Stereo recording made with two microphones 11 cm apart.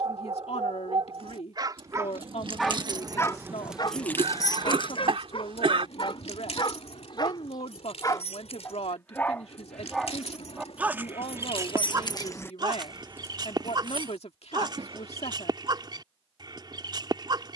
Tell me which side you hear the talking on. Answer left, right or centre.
left.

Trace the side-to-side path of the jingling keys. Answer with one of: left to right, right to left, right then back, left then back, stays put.
left then back.